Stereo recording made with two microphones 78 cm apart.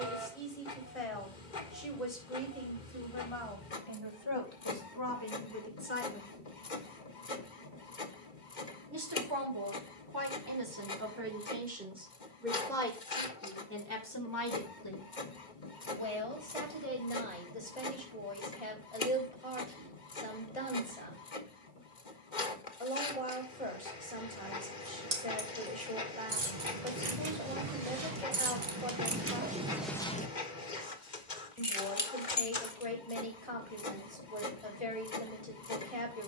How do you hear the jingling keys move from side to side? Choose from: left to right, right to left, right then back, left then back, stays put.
right to left.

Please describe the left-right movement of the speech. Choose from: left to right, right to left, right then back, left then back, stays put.
right then back.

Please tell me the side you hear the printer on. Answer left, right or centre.
left.